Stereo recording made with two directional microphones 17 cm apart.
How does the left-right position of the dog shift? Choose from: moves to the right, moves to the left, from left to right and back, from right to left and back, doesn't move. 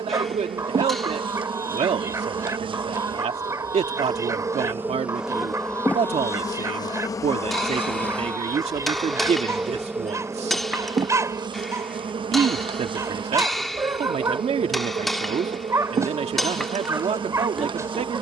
doesn't move.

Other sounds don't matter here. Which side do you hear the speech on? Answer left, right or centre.
right.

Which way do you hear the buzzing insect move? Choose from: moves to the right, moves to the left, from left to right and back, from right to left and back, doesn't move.
from right to left and back.